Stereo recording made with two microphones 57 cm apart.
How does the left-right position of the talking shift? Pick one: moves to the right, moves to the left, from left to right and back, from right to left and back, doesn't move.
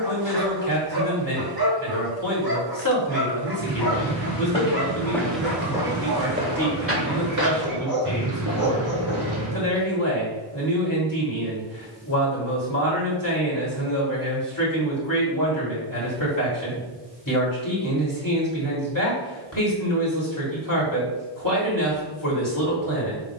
doesn't move.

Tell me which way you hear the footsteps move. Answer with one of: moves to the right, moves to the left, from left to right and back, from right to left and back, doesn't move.
moves to the right.